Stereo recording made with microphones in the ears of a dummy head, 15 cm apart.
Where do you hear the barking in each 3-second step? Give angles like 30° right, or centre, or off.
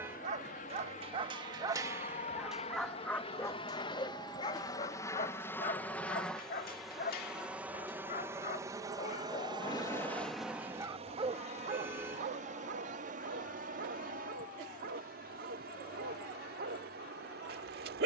20° right, 30° left, 60° left, centre, 60° right, 60° right.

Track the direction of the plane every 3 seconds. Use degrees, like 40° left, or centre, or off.
50° left, 20° left, 10° right, 30° right, 50° right, 60° right.